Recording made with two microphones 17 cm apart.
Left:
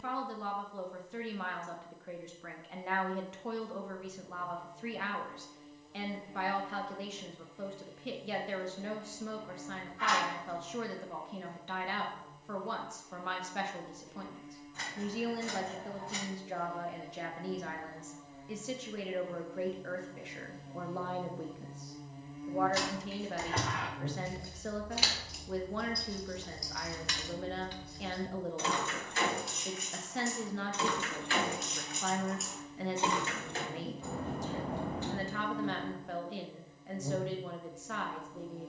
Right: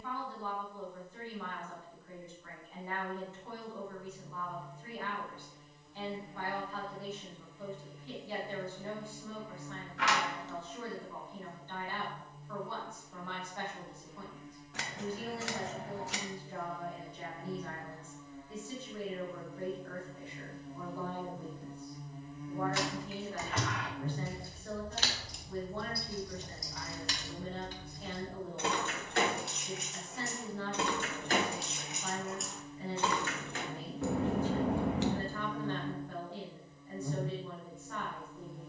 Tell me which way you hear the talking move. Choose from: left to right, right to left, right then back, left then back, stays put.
stays put.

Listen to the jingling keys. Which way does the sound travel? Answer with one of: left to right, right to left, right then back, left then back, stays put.
right then back.